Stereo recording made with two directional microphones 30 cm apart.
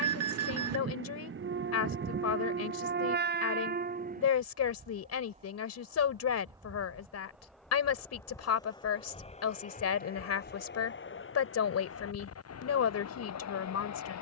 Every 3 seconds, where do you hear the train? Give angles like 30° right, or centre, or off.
40° right, 30° right, centre, 30° left, 60° left.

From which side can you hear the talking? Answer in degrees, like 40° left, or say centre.
60° left.